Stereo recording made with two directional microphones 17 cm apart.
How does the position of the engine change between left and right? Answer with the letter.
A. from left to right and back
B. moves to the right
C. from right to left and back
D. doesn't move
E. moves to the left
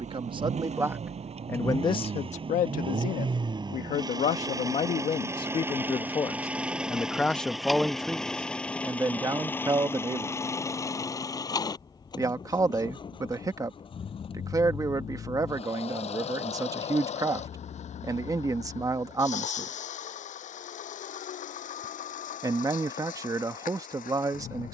E.